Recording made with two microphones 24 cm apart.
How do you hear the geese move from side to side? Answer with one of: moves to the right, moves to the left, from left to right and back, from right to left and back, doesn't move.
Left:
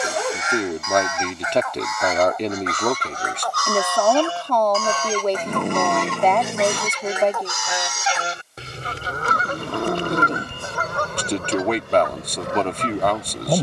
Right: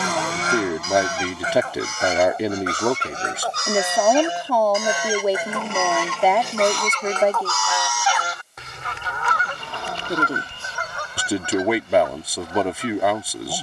moves to the left.